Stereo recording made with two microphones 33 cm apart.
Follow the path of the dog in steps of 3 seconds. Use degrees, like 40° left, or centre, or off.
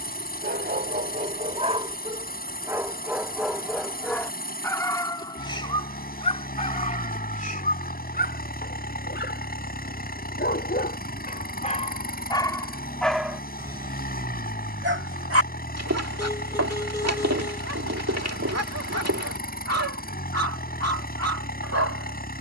20° right, 10° left, 20° left, 30° left, centre, 50° right, 50° right, 50° right.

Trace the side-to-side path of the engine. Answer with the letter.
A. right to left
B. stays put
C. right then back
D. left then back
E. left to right
B.